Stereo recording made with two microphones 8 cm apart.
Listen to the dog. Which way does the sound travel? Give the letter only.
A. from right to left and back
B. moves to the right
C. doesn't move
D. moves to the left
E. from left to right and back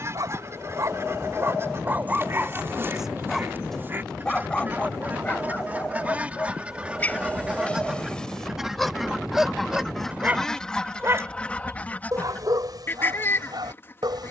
A.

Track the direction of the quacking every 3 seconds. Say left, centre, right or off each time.
right, right, centre, centre, left.